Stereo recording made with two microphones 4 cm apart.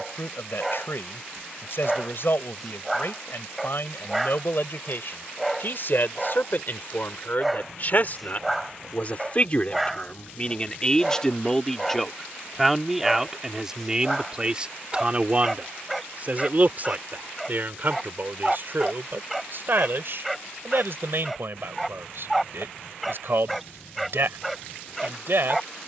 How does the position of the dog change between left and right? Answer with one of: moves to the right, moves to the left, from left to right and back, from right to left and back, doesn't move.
doesn't move.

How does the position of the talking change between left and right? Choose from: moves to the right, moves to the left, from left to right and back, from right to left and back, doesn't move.
moves to the right.